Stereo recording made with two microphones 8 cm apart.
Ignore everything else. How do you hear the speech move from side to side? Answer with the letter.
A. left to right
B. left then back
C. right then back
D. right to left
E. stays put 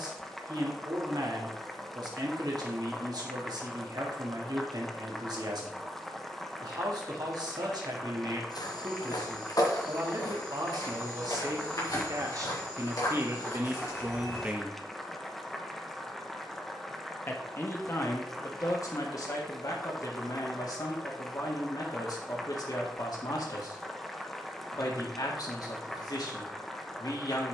D.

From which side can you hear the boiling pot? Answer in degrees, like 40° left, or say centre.
centre.